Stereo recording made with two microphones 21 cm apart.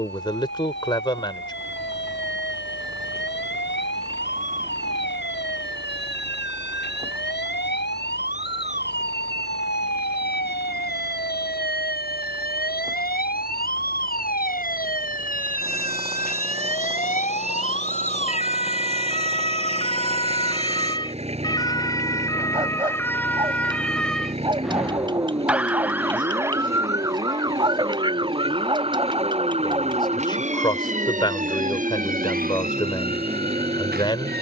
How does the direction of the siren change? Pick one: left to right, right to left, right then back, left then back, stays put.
left to right.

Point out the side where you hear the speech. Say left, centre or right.
left.